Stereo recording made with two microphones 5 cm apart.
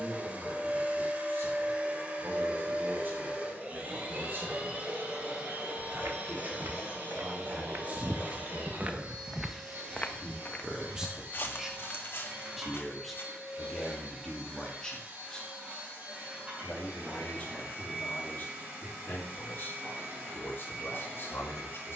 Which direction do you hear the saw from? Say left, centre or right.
left.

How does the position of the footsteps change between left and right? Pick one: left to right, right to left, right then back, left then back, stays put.
right to left.